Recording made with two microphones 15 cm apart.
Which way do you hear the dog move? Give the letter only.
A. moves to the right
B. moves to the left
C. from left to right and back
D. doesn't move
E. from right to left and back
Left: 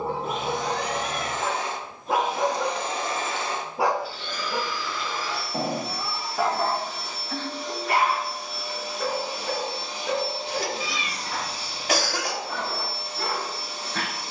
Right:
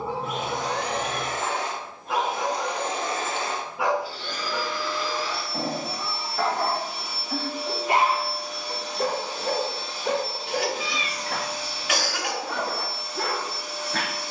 A.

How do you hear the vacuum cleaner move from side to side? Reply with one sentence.
In this clip you hear the vacuum cleaner travel towards the left.